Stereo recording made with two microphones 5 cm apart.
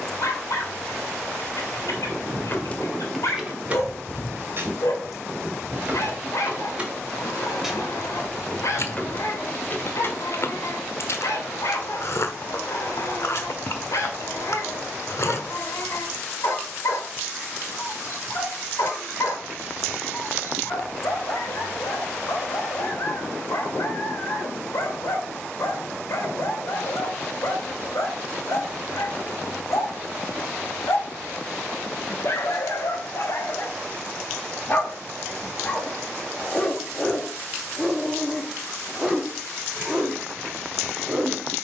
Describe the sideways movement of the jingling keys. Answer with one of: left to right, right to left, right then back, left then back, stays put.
right then back.